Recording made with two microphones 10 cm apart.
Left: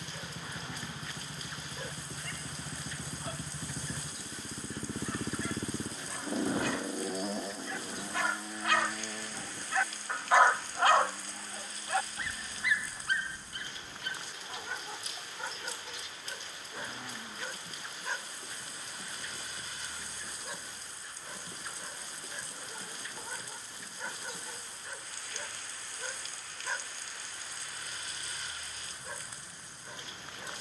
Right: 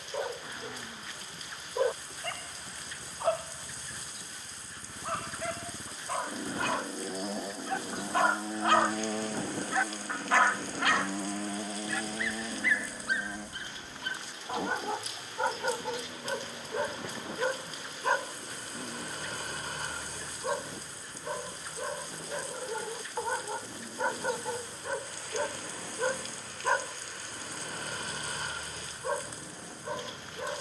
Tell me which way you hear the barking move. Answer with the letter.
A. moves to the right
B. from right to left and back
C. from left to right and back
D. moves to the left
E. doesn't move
B.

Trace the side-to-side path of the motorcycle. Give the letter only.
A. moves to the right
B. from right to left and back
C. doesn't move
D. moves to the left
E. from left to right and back
A.